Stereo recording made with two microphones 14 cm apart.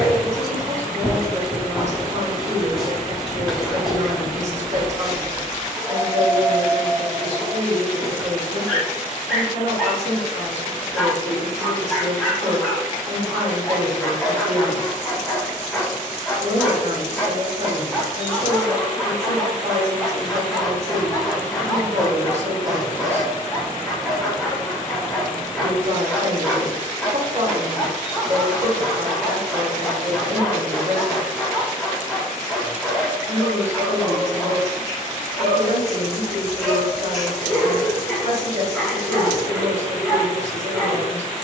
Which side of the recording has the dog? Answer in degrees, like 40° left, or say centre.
centre.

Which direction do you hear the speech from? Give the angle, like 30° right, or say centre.
50° right.